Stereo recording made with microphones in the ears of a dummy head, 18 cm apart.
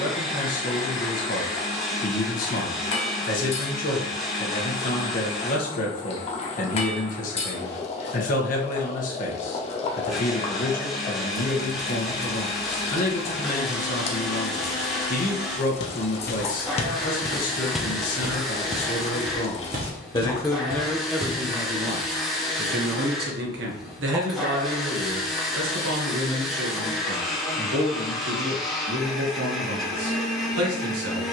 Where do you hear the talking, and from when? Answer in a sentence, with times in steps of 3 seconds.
You can hear the talking on the left from 0 s and on the right from 21 s.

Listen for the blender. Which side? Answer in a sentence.
In this clip you hear the blender in the centre.